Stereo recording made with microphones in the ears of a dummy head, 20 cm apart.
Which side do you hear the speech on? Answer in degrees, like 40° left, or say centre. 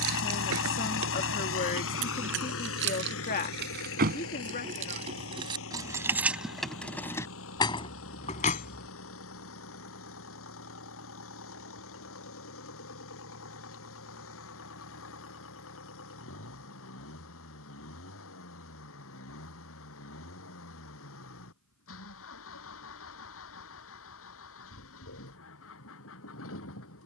40° left.